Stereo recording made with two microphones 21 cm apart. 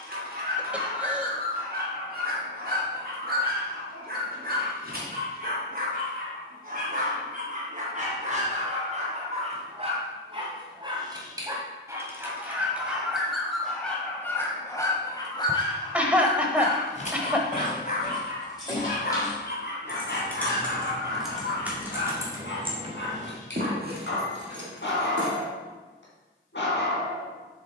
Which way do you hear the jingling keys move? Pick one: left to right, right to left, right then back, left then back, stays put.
left to right.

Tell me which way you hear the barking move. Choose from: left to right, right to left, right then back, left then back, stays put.
right to left.